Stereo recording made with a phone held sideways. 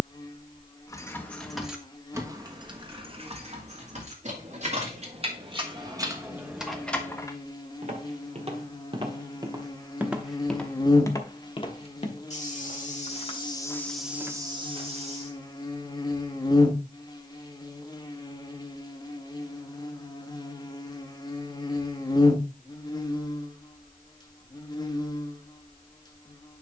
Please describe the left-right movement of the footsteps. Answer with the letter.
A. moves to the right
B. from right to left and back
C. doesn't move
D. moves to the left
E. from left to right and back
B.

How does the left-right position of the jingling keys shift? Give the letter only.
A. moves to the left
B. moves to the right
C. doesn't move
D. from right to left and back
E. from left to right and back
E.